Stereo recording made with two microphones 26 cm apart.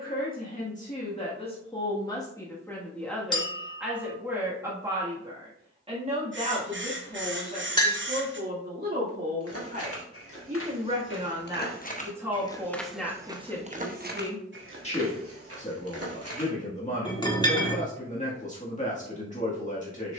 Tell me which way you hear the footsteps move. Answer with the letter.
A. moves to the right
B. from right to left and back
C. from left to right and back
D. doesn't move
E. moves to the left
A.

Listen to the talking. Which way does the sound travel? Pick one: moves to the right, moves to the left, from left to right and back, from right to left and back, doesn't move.
from left to right and back.